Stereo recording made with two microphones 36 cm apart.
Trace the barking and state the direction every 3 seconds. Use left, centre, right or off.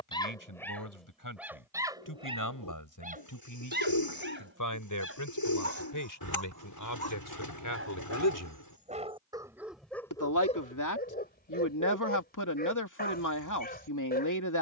centre, right, right, centre, left.